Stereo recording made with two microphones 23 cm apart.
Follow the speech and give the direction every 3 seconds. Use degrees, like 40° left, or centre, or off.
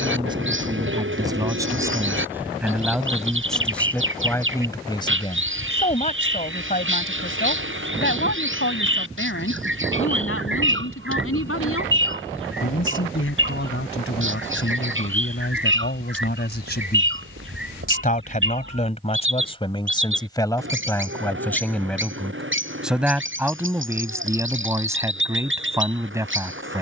10° right, 10° left, 50° left, 70° left, 60° left, 50° left, 20° left, centre, 10° right.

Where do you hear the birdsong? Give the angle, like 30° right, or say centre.
60° right.